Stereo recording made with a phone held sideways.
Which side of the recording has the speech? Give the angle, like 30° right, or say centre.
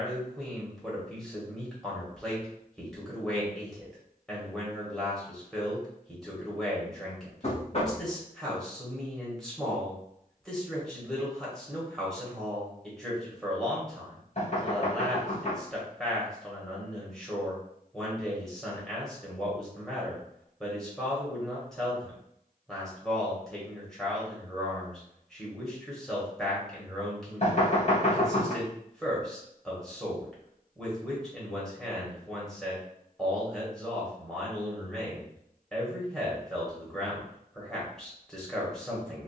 centre.